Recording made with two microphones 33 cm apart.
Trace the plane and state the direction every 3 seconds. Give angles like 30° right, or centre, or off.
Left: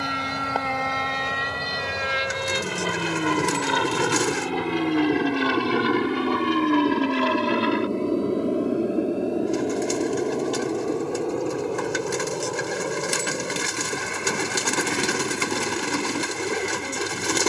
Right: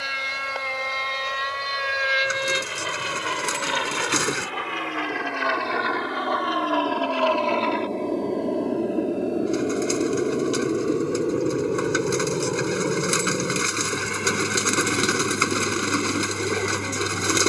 70° left, 60° left, 20° left, 10° right, 30° right, 50° right.